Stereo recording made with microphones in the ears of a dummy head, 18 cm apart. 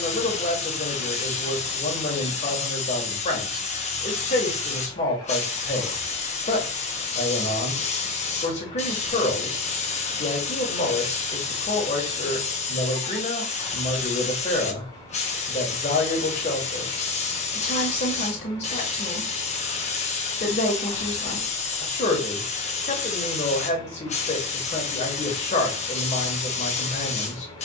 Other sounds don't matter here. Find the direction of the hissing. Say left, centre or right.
left.